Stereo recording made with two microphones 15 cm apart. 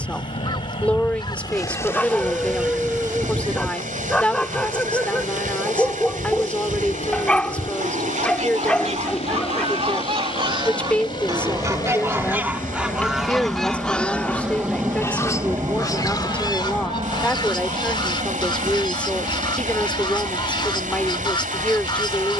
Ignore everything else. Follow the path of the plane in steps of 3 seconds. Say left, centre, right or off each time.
left, left, left, left, centre, right, right, right.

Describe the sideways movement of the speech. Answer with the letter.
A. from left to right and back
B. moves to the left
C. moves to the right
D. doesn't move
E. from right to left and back
D.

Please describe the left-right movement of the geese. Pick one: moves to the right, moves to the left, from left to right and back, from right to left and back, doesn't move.
from left to right and back.